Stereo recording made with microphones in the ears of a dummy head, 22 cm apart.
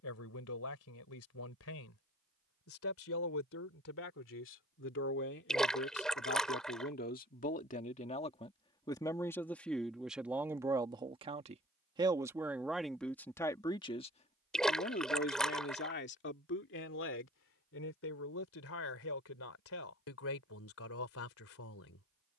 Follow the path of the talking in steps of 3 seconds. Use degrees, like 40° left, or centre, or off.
60° left, 50° left, 30° left, 10° right, 10° left, 50° left, 60° left, 60° left.